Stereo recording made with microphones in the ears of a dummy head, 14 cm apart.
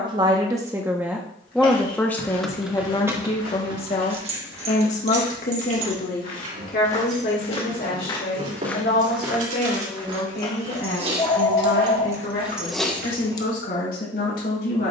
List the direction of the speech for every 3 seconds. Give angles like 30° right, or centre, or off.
centre, 40° left, 60° left, 70° left, 70° left.